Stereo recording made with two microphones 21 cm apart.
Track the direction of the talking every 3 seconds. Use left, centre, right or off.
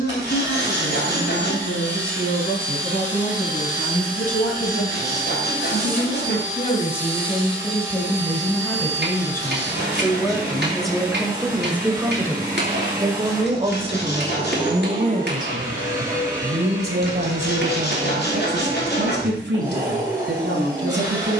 left, left, left, centre, right, right, right.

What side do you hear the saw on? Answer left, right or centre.
left.